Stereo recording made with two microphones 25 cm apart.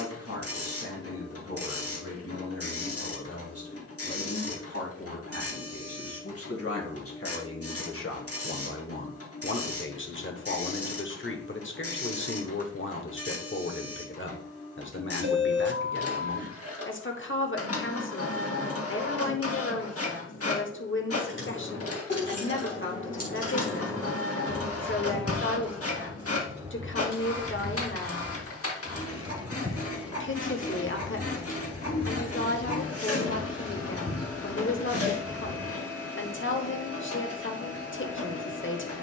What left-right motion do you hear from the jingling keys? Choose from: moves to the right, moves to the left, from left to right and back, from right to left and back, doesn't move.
from left to right and back.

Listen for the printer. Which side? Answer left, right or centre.
left.